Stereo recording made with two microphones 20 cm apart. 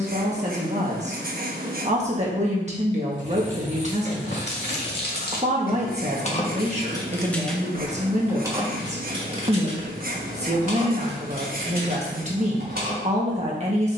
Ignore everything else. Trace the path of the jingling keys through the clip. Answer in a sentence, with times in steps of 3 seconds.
In this clip you hear the jingling keys not at all from 0 s, on the left from 3 s, in the centre from 6 s and on the right from 9 s.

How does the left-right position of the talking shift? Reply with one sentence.
You can hear the talking stay in one place.